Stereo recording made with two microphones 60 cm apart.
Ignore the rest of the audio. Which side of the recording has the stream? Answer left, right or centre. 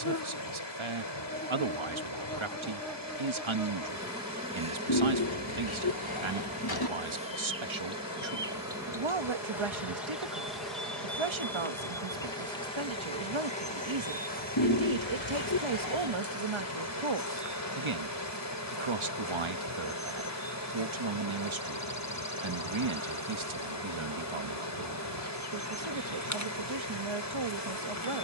left.